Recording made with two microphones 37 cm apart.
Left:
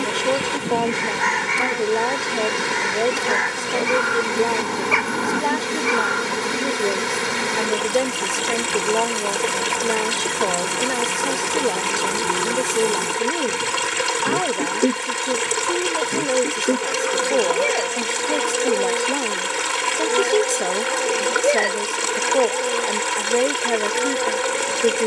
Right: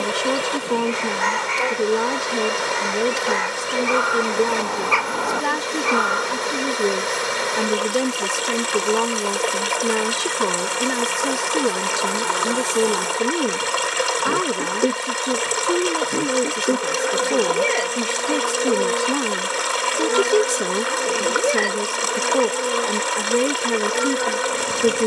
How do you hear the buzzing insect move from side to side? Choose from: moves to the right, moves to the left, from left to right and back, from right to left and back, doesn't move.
moves to the right.